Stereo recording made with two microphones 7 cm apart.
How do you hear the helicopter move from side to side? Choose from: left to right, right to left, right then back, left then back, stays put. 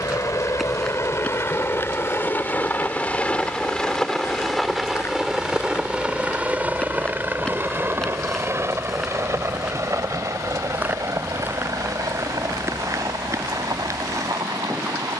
left to right.